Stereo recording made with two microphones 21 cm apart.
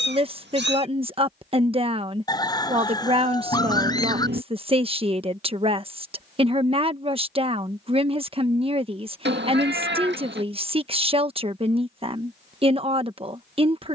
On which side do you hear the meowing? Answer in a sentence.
You can hear the meowing on the right.